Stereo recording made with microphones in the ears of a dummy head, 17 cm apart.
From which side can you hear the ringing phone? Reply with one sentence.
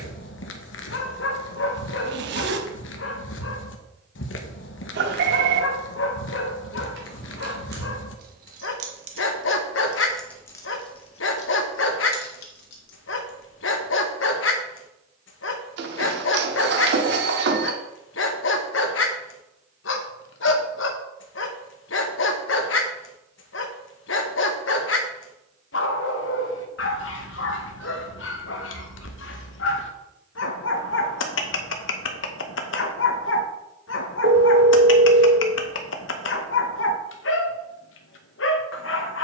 You can hear the ringing phone on the right.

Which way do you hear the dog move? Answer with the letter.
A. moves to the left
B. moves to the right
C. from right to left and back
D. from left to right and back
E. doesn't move
E.